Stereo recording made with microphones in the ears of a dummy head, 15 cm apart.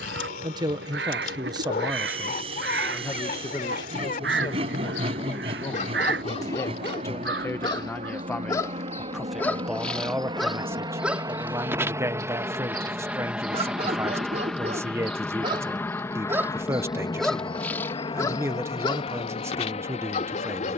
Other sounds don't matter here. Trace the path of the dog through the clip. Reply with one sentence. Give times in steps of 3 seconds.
In this clip you hear the dog on the left from 0 s, in the centre from 9 s, on the right from 12 s, in the centre from 15 s and on the left from 18 s.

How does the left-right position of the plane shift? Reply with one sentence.
In this clip you hear the plane travel towards the left.